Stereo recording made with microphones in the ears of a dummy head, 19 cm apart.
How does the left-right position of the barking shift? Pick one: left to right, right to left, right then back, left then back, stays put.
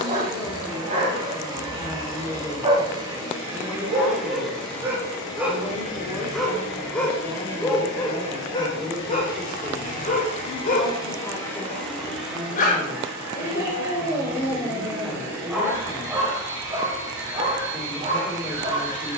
left then back.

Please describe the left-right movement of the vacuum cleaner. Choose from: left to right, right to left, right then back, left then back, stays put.
left then back.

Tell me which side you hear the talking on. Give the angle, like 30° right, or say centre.
10° left.